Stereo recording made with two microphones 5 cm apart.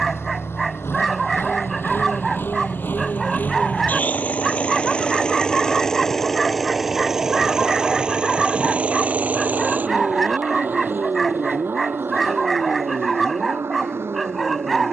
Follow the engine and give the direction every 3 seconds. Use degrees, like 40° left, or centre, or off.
60° left, 30° left, 10° right, 40° right, 60° right.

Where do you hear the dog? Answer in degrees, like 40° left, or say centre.
centre.